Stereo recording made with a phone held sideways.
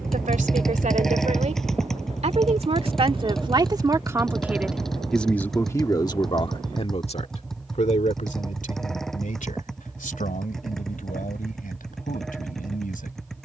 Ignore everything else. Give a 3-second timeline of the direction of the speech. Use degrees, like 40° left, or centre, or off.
50° right, 10° right, 50° left, 70° left, 80° left.